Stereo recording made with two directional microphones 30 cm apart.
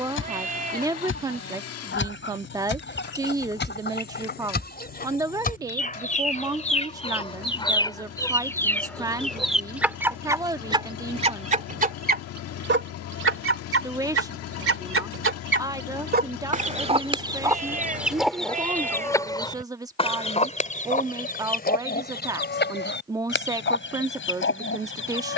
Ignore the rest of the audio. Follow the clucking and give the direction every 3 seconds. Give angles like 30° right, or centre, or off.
40° left, 40° left, 20° left, 10° right, 50° right, 20° right, 10° left, 40° left, 40° left.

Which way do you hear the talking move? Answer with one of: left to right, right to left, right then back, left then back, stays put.
stays put.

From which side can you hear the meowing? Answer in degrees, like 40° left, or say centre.
30° right.